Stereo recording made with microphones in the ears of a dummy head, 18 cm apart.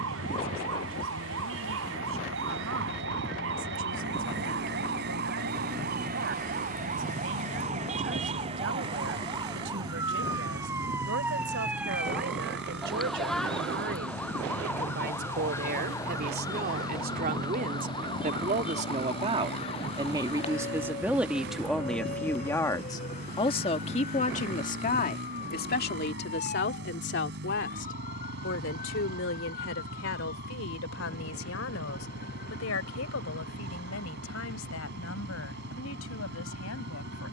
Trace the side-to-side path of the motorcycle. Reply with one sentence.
You can hear the motorcycle stay put.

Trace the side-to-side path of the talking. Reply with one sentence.
You can hear the talking go from the right side to the left.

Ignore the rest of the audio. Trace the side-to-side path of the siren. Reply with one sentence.
You can hear the siren move to the left.